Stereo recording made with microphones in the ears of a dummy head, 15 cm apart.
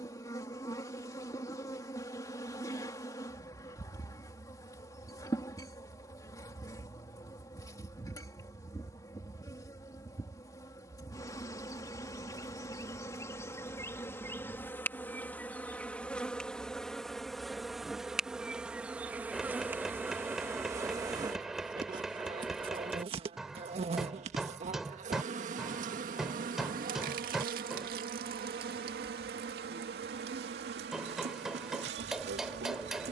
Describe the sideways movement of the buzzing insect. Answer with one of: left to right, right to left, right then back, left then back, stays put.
left to right.